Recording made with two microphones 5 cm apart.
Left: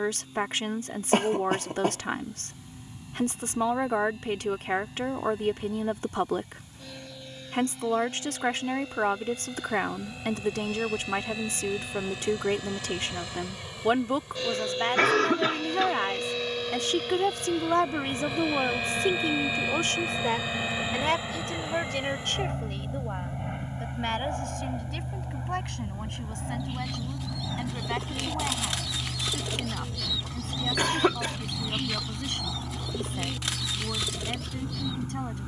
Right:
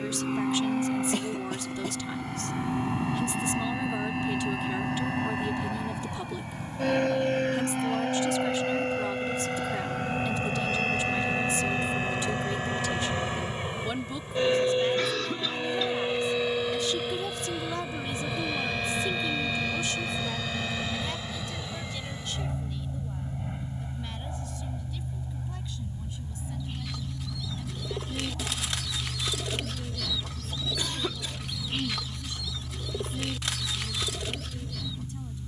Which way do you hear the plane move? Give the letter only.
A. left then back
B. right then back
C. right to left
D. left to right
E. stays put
C.